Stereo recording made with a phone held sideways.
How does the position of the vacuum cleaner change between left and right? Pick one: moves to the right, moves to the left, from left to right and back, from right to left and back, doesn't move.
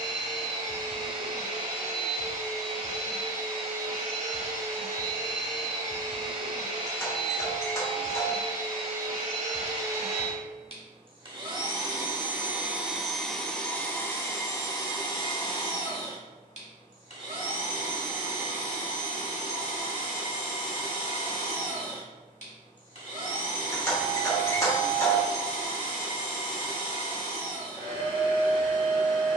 moves to the left.